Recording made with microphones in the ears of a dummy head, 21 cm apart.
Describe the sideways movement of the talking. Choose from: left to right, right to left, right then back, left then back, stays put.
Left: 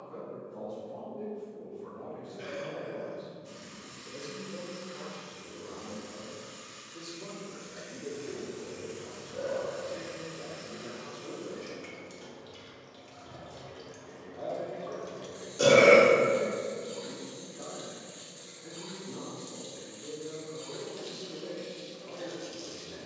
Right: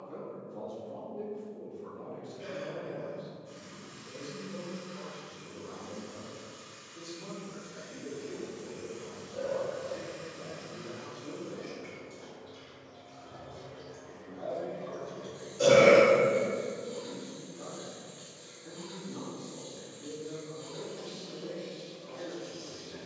right to left.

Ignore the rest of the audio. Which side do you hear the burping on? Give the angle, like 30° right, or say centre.
60° left.